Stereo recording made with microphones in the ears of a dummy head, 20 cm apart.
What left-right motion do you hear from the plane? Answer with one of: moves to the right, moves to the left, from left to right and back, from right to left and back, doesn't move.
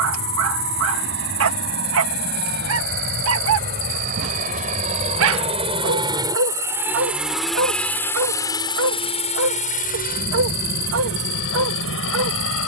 moves to the left.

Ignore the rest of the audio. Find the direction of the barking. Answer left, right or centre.
right.